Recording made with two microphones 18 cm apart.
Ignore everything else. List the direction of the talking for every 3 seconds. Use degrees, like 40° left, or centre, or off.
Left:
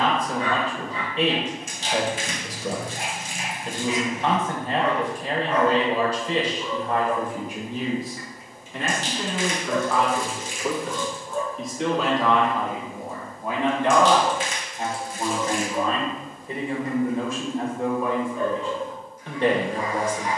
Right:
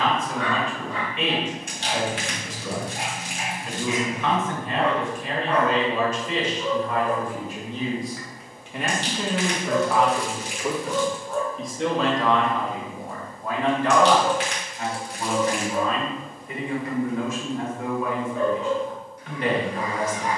30° left, 30° left, 10° left, 10° right, 10° left, 30° left, 30° left.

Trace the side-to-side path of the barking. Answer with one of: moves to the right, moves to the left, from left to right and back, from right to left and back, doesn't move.
doesn't move.